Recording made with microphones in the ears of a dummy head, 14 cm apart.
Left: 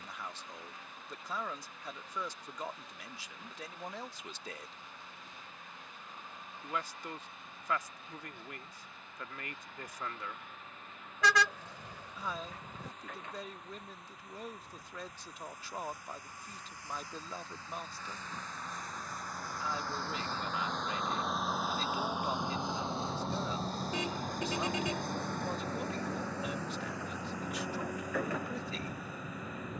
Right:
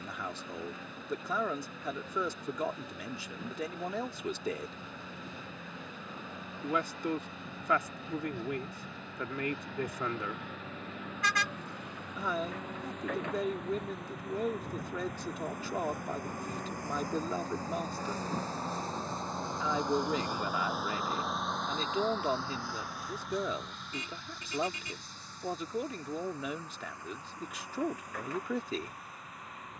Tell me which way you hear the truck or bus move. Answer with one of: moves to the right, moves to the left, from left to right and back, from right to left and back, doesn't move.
moves to the left.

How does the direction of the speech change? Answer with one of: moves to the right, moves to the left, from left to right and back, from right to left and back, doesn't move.
doesn't move.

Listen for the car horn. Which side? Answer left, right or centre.
left.